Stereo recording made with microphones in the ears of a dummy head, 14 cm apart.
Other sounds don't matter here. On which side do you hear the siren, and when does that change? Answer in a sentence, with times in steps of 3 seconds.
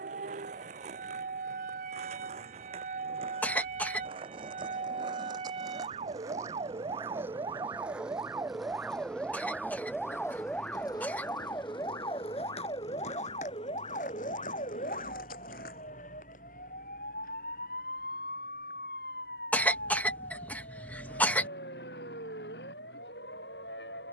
In this clip you hear the siren on the right from 0 s, in the centre from 9 s and on the left from 12 s.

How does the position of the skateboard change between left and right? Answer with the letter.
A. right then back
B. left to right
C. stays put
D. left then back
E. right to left
E.